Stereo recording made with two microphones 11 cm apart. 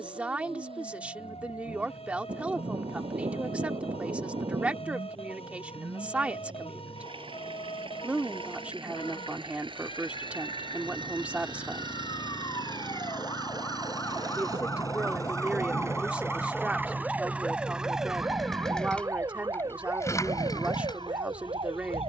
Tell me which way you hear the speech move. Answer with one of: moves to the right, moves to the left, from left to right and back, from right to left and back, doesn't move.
doesn't move.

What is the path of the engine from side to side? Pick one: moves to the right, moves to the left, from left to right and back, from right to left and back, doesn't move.
moves to the left.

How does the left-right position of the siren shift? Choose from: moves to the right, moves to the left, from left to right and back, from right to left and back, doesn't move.
moves to the right.